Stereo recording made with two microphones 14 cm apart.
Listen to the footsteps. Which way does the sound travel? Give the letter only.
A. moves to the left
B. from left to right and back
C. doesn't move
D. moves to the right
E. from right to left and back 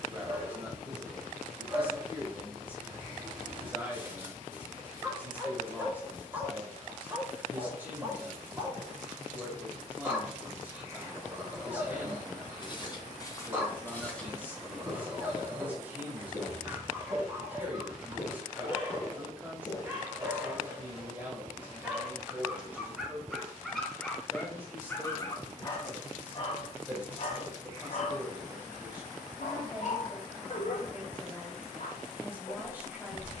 B.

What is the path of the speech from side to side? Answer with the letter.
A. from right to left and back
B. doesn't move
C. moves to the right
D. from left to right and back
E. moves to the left
B.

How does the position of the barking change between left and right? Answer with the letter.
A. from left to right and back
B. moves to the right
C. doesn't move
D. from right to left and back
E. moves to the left
E.